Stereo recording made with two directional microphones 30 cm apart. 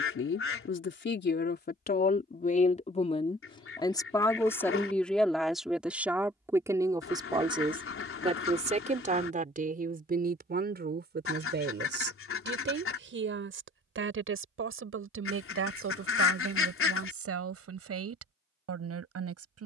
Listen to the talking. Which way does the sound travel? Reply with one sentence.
You can hear the talking move from left to right.